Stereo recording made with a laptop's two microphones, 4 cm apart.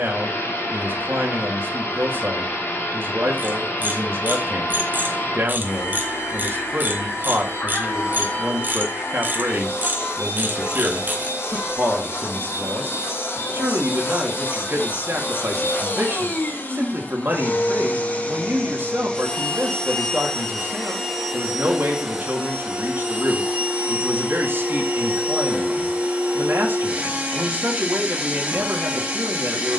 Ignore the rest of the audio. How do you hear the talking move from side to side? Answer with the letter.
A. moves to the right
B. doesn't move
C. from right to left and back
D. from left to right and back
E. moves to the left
B.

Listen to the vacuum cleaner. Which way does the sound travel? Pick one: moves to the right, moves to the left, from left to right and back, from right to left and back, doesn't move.
moves to the right.